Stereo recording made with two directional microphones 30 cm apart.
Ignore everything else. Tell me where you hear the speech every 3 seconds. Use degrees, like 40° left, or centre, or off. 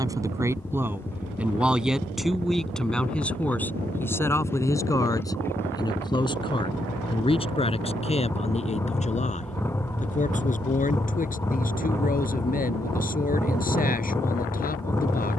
centre, 10° left, 20° left, 30° left, 30° left.